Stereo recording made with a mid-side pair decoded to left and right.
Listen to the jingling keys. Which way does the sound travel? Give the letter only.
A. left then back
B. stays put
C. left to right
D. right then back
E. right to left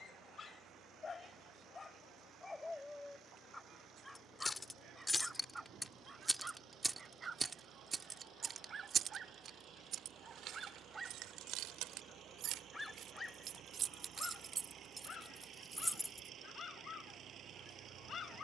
D.